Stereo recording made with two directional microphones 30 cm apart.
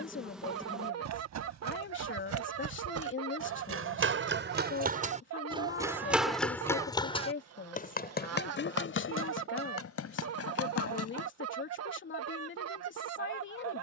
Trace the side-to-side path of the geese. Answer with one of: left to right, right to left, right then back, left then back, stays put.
stays put.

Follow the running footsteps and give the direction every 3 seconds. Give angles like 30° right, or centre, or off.
60° right, 30° right, 20° left, 50° left, off.